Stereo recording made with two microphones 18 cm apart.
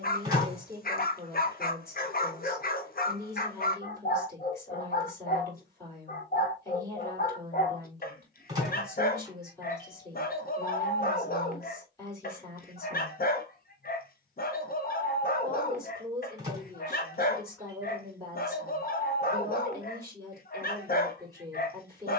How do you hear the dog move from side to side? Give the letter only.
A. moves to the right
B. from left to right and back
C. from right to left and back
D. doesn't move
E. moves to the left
D.